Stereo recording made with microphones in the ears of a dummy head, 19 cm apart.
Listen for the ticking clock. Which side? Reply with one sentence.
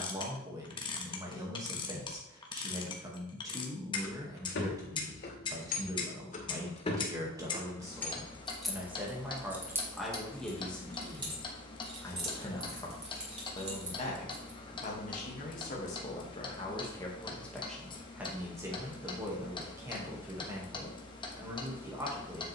You can hear the ticking clock on the left.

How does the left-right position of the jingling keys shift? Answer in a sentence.
You can hear the jingling keys move from left to right.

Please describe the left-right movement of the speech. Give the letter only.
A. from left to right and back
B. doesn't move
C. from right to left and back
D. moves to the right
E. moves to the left
C.